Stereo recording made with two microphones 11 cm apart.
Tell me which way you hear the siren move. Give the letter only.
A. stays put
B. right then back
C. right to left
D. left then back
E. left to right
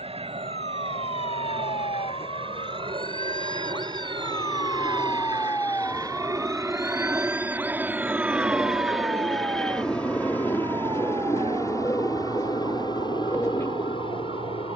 E.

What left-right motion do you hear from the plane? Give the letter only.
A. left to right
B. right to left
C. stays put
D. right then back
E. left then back
B.